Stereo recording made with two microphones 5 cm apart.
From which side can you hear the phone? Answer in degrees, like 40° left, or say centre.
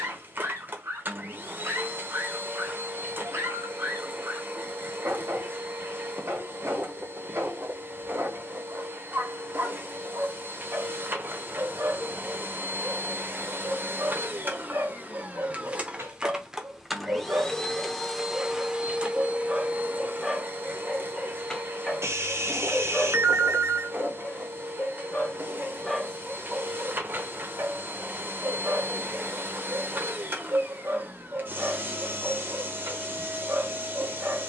70° right.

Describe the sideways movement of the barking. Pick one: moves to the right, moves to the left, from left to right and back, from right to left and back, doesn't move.
from right to left and back.